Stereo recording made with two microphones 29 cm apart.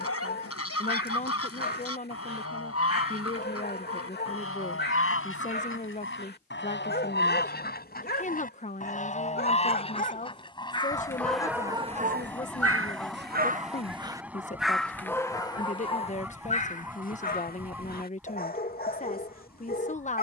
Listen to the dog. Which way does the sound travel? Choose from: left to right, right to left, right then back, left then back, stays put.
right then back.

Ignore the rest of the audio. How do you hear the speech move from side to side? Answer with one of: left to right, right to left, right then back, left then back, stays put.
stays put.